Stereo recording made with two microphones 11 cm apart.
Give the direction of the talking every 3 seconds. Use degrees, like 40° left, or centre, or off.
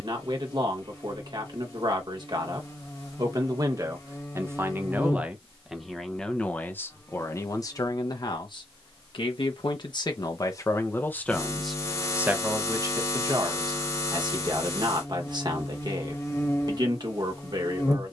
40° right, 20° right, 30° left, 30° left, 30° right, 40° right.